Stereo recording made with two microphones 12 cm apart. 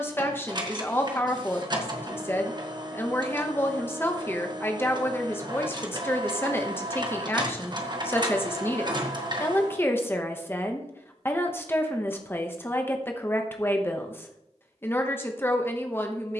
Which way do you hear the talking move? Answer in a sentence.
In this clip you hear the talking stay in one place.